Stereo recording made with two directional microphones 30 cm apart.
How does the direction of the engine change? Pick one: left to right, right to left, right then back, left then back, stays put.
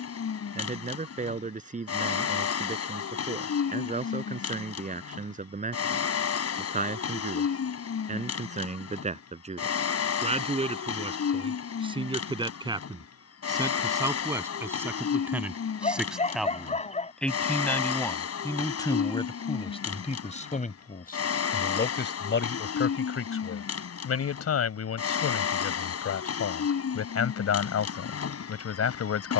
stays put.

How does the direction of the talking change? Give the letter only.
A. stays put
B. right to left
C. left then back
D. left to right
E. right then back
B.